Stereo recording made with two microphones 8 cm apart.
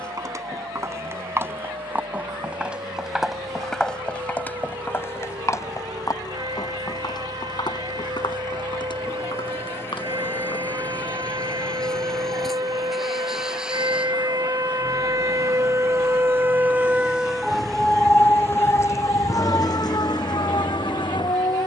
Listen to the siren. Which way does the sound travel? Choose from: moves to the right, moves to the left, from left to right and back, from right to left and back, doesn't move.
moves to the left.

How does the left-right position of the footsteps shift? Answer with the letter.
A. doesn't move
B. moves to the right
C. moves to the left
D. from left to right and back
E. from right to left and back
C.